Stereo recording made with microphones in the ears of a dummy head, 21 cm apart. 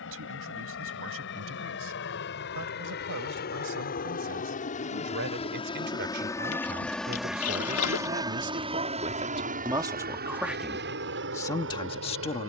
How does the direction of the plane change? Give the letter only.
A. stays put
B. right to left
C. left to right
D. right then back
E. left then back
C.